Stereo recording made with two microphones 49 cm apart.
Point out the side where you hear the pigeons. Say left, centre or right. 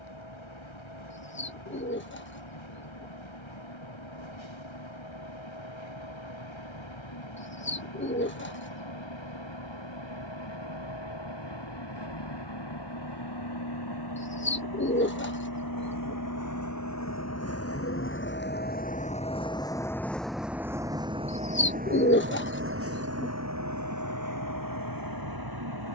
left.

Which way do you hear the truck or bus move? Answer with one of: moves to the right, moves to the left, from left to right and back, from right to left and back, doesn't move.
moves to the right.